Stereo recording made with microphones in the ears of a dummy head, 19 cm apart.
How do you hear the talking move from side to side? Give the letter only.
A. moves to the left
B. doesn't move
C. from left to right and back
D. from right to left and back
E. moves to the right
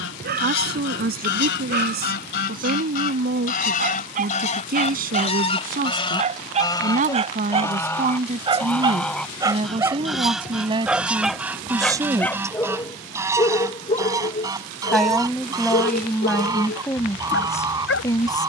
A.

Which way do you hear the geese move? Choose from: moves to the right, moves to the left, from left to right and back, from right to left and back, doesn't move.
moves to the right.